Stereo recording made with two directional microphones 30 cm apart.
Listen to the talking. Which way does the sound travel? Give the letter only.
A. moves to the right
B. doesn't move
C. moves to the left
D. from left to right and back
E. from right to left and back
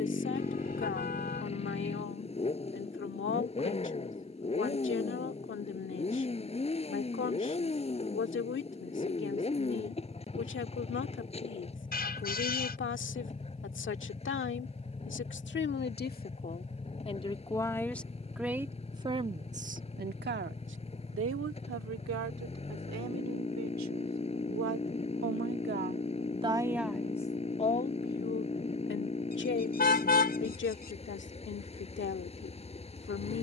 D.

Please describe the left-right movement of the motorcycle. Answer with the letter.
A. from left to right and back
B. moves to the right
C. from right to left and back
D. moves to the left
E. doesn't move
E.